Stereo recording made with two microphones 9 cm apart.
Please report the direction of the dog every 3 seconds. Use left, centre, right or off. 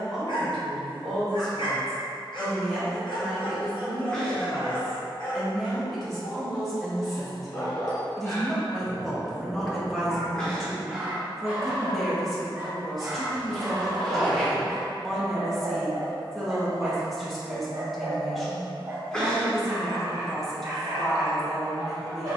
left, left, left, centre, right, right, right, right.